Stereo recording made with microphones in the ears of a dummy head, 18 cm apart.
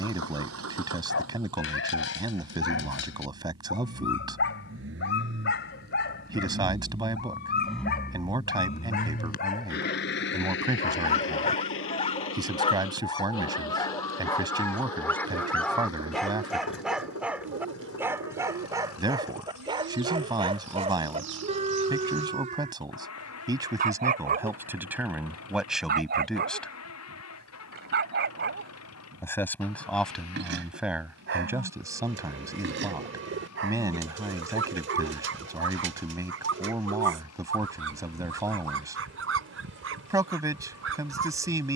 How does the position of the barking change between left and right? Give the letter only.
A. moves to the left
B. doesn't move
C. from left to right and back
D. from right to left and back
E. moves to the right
E.